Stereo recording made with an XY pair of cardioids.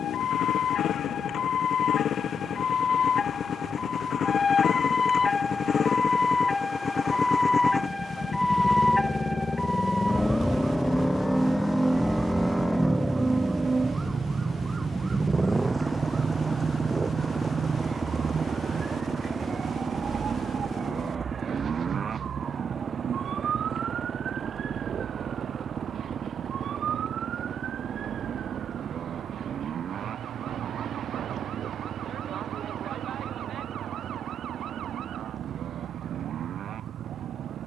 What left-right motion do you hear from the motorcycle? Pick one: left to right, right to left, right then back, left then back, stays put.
left to right.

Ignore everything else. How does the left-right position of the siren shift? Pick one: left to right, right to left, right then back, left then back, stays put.
left to right.